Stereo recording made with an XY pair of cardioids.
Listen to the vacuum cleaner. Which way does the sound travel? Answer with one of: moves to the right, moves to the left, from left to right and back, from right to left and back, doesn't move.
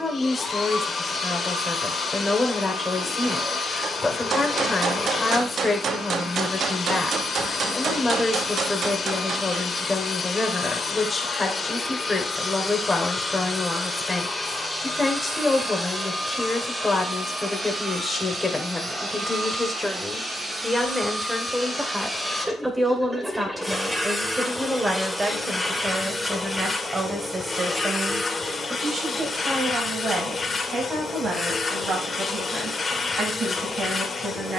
from left to right and back.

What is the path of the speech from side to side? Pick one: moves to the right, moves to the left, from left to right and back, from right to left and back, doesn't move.
moves to the right.